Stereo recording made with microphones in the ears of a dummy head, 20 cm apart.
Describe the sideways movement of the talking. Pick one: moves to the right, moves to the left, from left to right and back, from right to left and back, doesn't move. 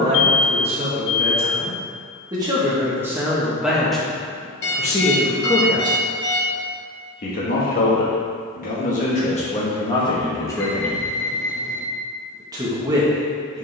from right to left and back.